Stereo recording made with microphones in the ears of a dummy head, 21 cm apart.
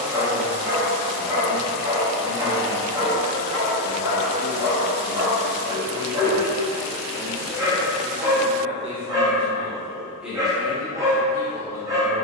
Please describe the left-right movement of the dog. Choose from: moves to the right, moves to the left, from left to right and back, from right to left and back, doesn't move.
doesn't move.